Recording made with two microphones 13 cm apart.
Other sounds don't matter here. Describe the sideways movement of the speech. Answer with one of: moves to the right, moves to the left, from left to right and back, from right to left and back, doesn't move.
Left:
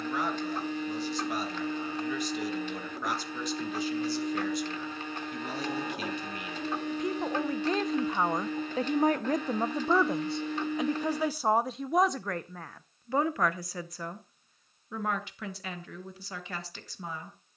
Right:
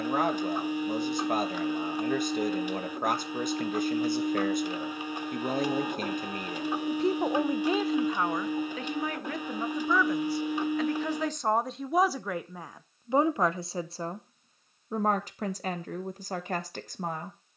from right to left and back.